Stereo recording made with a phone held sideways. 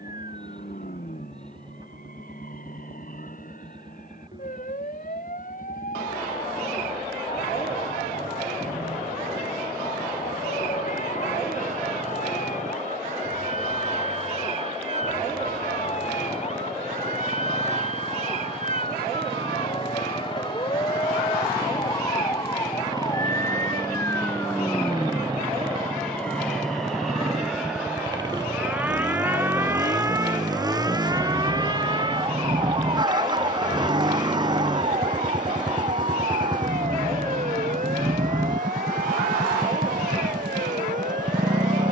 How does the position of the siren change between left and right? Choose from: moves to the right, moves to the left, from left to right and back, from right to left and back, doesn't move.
moves to the right.